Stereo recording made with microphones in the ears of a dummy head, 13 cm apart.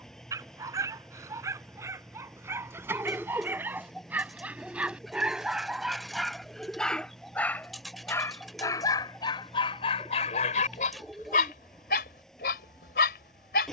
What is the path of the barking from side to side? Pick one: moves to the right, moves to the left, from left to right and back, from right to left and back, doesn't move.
moves to the left.